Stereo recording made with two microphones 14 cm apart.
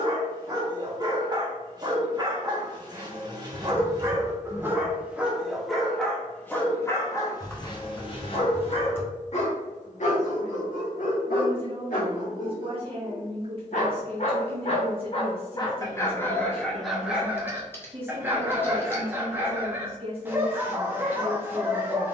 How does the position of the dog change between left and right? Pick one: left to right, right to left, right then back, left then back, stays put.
left then back.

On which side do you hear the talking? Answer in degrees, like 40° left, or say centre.
40° right.